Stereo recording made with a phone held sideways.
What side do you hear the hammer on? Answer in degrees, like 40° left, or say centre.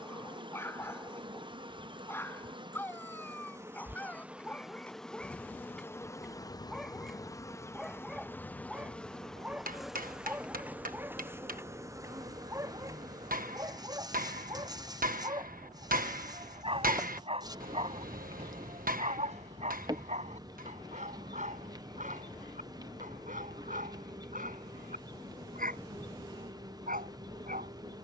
70° right.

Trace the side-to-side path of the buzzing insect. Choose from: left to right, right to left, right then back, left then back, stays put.
left then back.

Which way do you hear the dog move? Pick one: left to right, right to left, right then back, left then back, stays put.
left to right.